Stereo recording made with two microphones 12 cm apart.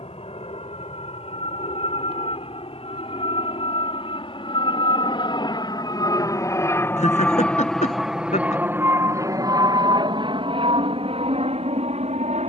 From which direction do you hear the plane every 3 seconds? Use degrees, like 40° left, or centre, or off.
70° left, 50° left, 10° left, 40° right.